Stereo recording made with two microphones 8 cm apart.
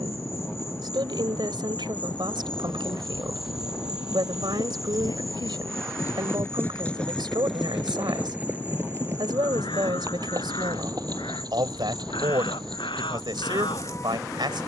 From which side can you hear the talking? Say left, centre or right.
right.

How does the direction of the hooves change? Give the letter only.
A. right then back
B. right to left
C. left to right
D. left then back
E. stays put
C.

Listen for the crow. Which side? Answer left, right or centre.
left.